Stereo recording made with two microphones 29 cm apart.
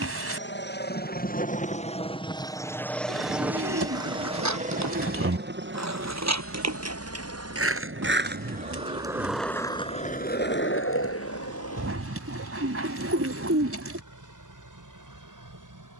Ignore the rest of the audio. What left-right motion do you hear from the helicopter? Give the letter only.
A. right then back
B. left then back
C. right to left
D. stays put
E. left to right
E.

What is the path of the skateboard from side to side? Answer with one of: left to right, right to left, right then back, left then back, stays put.
right to left.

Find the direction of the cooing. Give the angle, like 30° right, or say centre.
50° right.